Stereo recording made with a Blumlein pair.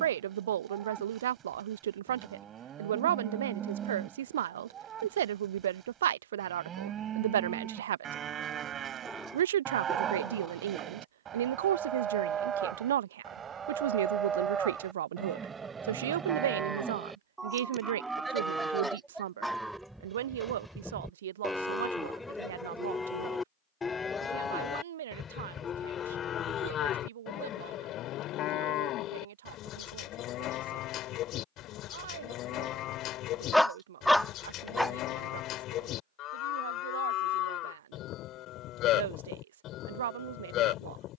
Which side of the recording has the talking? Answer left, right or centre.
right.